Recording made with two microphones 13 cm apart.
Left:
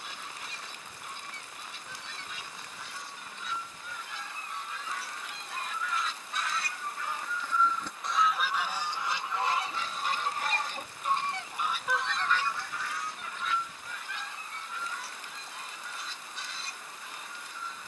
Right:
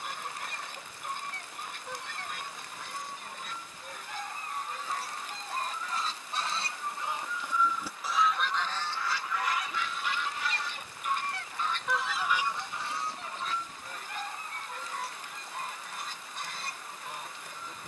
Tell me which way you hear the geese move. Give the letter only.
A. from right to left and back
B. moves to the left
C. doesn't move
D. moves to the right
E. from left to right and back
A.